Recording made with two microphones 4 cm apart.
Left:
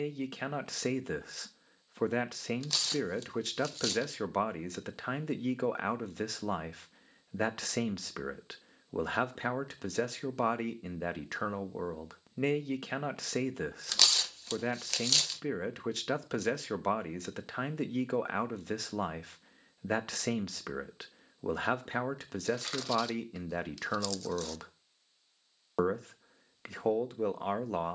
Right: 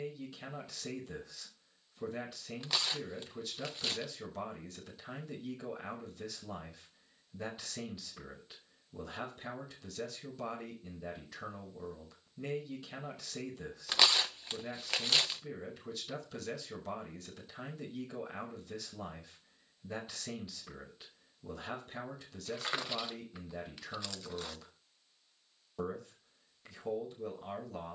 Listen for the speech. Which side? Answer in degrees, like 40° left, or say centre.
80° left.